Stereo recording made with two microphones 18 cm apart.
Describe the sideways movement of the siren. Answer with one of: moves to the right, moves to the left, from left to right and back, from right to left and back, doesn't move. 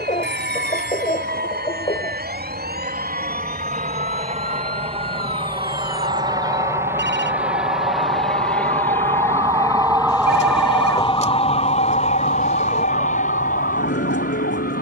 moves to the left.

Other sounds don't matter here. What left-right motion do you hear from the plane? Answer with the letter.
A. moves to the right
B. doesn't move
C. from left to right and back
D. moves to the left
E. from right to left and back
D.